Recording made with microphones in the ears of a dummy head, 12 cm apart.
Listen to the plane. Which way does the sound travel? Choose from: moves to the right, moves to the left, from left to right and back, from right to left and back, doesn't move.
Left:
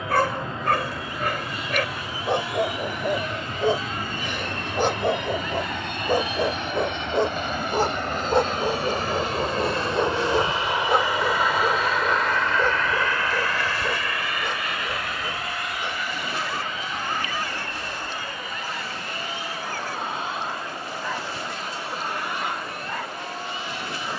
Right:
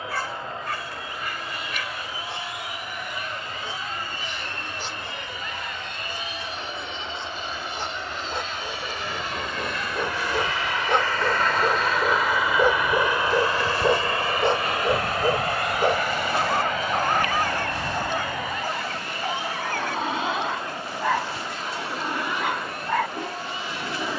moves to the right.